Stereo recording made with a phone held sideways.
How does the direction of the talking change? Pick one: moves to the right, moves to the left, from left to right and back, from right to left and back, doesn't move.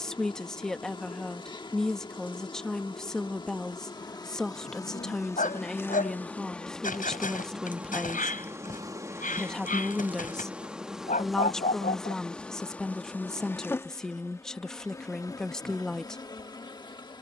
doesn't move.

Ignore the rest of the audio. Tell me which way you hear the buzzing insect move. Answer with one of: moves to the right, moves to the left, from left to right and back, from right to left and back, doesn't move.
from left to right and back.